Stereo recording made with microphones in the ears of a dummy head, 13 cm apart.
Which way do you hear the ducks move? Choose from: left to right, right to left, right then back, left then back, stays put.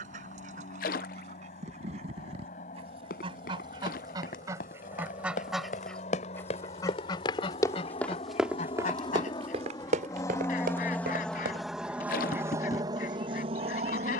right to left.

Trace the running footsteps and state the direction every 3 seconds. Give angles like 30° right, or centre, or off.
off, 60° left, 20° left, 60° right, off.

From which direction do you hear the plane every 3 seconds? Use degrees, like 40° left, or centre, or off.
60° left, 60° left, 50° left, 20° left, 30° right.